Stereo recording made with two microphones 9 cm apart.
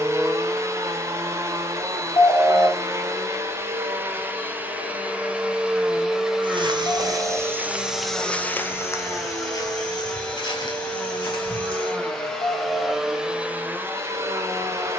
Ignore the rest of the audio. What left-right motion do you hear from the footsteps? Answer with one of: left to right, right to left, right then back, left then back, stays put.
right to left.